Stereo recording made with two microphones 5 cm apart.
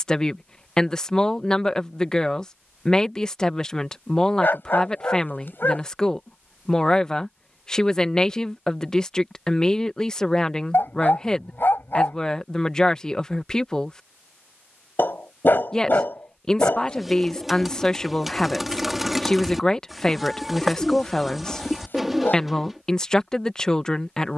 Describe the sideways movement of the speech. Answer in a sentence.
In this clip you hear the speech stay put.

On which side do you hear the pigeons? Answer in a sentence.
In this clip you hear the pigeons in the centre.